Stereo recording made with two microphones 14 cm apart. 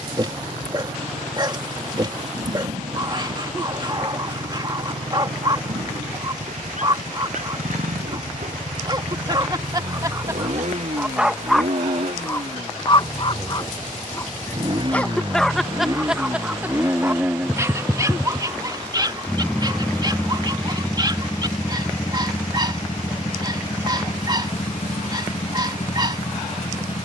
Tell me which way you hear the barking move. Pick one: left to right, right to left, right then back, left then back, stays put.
left then back.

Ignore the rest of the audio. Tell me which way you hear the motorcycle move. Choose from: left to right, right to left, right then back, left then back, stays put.
right to left.